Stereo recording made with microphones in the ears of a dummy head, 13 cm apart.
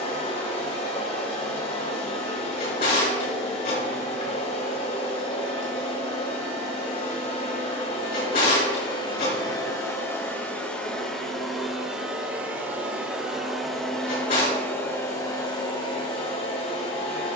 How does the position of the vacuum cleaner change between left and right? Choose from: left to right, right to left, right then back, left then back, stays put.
right then back.